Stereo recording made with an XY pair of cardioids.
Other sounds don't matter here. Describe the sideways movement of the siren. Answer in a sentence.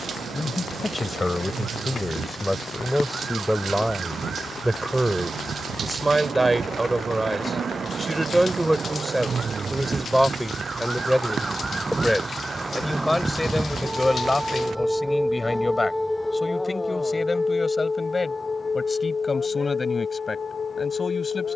You can hear the siren move from right to left.